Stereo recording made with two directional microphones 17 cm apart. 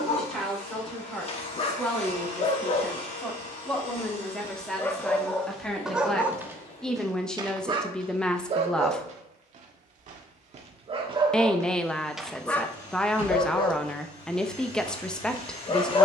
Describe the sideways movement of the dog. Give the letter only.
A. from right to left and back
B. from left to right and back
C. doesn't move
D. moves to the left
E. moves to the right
B.